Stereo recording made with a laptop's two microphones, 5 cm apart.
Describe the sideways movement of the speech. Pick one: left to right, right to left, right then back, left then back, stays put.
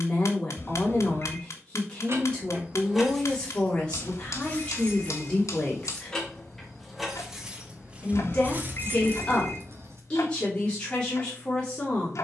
stays put.